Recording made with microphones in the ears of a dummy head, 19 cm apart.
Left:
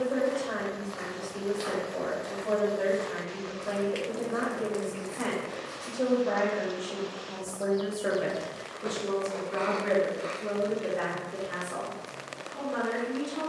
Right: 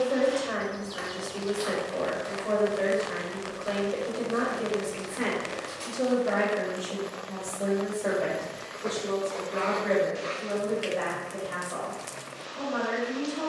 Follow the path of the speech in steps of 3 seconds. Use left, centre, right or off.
right, right, centre, left, left.